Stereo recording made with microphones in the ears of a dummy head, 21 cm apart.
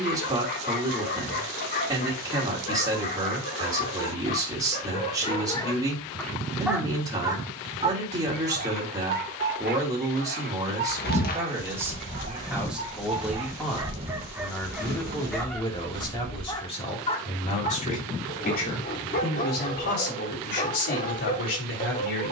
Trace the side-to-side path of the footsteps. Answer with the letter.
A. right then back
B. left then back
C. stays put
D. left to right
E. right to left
D.